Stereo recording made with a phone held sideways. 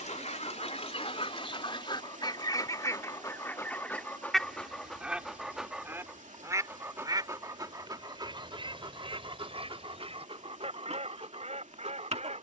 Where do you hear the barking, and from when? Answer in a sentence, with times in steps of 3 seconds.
In this clip you hear the barking on the left from 0 s, in the centre from 3 s and on the right from 6 s.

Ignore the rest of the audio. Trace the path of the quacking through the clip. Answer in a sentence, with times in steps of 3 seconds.
You can hear the quacking on the left from 0 s, in the centre from 3 s and on the right from 6 s.